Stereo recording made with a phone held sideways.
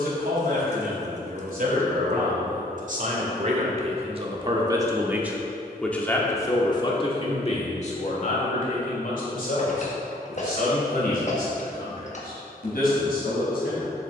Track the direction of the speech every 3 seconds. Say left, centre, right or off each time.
right, right, left, left, left.